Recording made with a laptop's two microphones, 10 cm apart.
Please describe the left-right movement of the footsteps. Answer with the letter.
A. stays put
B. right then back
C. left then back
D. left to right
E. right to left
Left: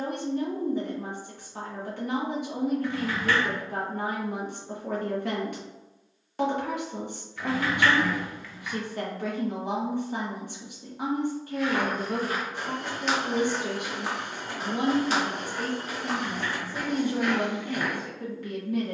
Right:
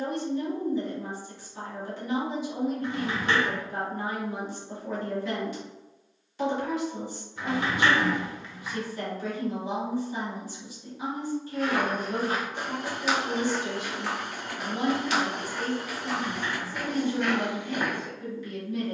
C.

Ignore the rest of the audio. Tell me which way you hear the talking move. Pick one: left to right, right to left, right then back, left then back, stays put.
stays put.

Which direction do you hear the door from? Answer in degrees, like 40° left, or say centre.
20° right.